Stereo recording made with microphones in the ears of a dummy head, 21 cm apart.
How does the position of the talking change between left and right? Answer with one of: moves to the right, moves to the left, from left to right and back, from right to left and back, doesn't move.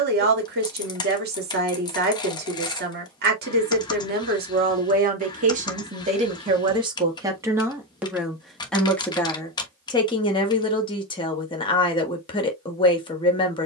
moves to the left.